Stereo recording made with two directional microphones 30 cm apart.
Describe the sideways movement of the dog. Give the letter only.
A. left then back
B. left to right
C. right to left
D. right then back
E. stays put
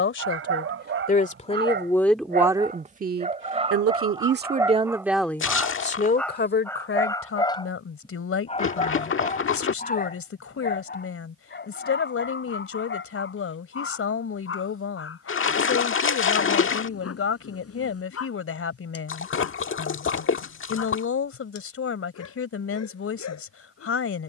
C.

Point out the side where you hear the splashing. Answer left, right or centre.
left.